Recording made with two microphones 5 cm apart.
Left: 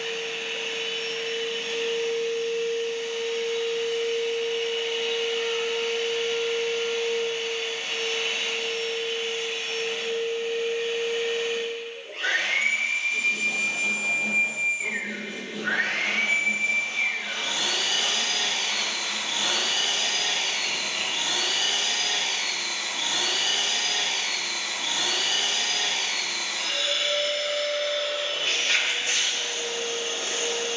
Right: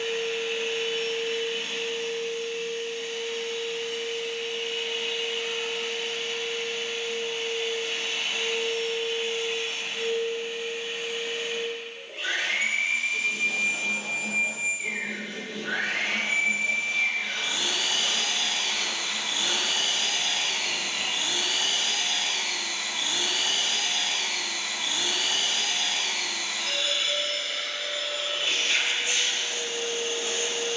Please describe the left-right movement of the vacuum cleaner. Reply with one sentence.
You can hear the vacuum cleaner stay put.